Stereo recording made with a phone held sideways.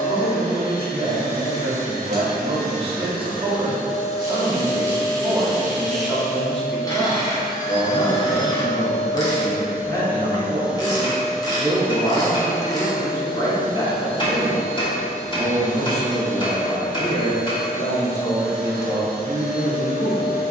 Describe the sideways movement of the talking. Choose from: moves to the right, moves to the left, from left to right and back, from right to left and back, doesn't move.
moves to the left.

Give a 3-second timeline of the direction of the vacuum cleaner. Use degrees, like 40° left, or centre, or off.
70° left, 30° left, 30° right, 10° right, 30° left, 50° left, 70° left.